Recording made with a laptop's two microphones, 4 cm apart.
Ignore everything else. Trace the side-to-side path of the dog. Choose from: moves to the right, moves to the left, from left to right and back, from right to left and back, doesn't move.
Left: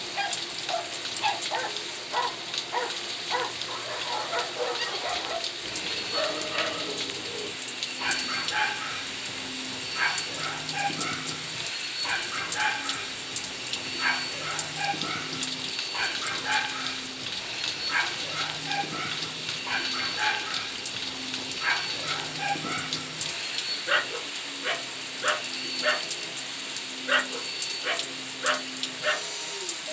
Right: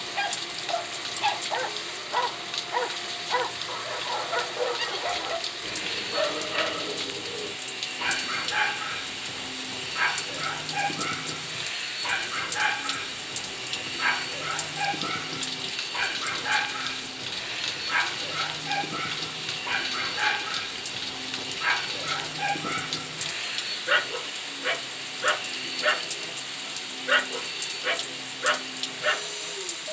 doesn't move.